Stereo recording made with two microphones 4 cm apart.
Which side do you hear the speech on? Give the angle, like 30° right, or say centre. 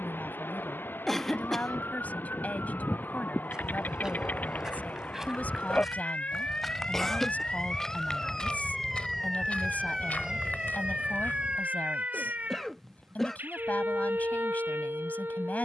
40° left.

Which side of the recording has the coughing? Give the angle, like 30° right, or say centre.
10° left.